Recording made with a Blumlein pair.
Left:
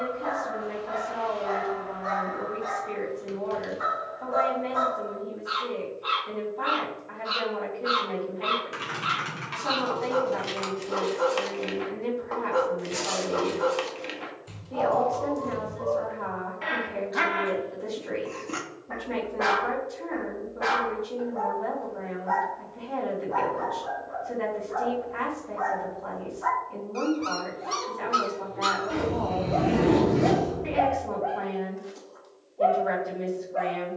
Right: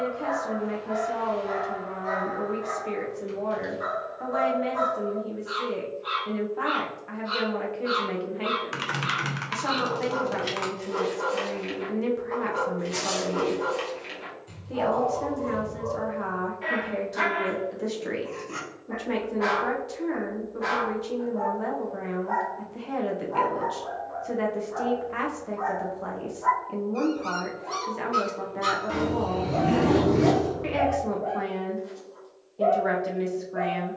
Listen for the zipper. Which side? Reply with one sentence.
You can hear the zipper in the centre.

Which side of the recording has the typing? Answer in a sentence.
You can hear the typing on the right.